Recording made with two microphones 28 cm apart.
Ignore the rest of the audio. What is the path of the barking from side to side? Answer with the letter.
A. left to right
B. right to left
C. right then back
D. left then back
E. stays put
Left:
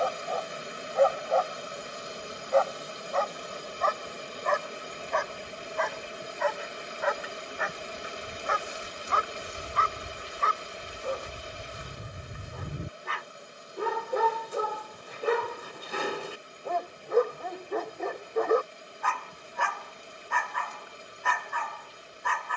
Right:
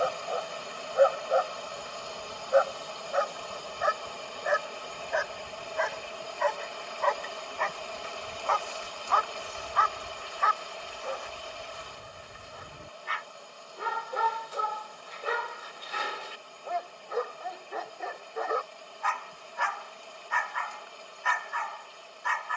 B.